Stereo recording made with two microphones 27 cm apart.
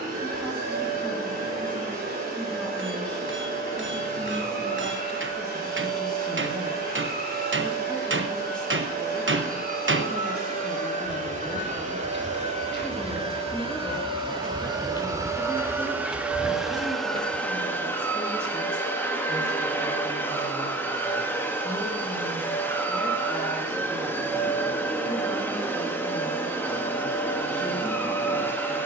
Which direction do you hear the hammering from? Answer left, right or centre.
right.